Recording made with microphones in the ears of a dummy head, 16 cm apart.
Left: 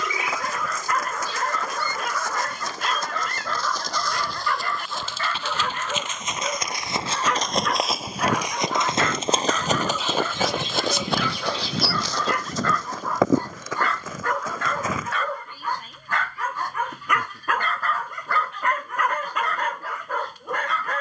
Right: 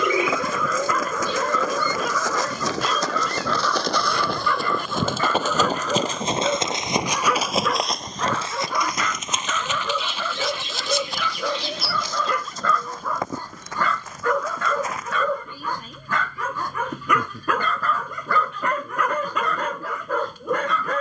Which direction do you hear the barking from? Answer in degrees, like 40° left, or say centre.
80° right.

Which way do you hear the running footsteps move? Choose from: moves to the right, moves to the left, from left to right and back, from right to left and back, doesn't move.
moves to the left.